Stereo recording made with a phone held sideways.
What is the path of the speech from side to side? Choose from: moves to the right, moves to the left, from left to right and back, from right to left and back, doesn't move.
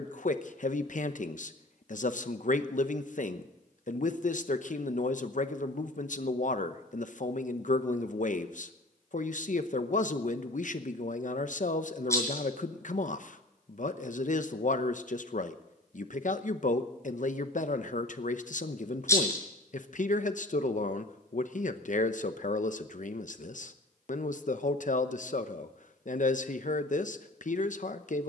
doesn't move.